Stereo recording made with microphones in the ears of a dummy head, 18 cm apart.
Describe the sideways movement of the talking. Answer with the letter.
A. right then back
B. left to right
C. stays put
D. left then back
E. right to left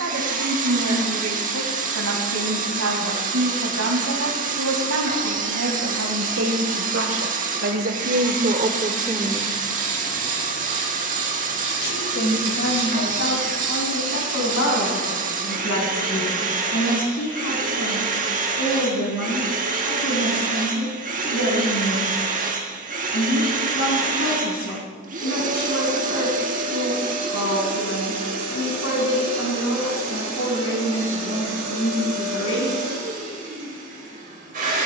E.